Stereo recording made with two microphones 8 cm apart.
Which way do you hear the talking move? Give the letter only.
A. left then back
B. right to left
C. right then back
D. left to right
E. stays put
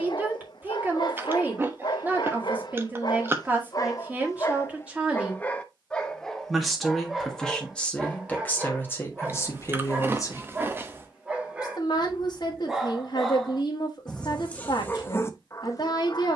B.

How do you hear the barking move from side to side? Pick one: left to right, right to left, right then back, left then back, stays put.
right then back.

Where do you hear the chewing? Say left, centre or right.
right.